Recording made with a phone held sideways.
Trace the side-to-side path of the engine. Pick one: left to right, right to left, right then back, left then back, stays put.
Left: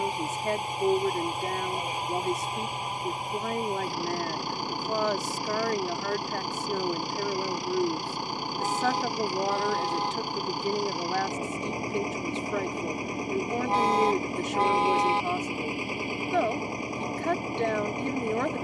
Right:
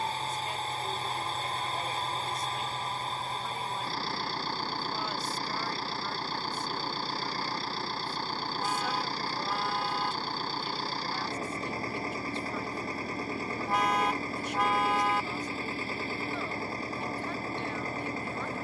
stays put.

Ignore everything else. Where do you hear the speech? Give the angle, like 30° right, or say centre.
70° left.